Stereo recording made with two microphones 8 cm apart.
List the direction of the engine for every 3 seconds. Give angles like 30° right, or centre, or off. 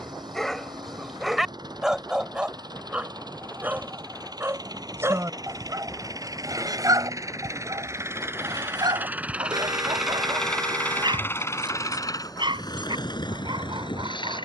60° right, 50° right, 40° right, 10° left, 60° left.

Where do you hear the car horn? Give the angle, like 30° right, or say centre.
50° right.